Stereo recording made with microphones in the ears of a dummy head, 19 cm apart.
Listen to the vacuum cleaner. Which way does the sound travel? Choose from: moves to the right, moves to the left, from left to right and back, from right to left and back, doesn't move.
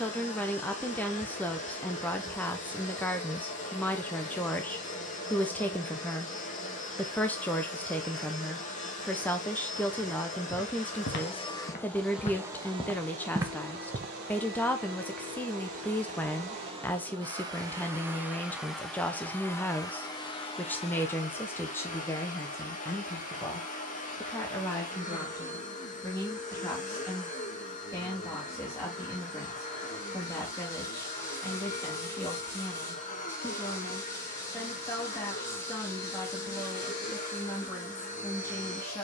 from left to right and back.